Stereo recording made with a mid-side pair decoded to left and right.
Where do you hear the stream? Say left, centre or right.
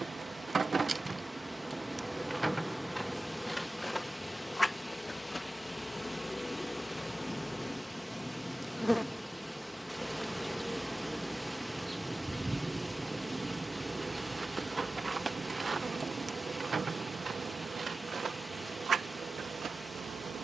centre.